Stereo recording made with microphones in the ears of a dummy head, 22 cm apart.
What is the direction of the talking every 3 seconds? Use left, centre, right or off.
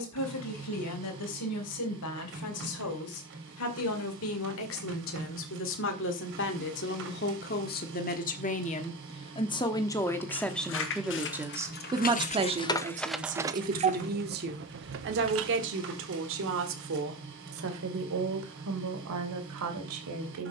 left, left, left, centre, right, right, right.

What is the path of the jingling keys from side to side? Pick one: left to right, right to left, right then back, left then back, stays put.
left to right.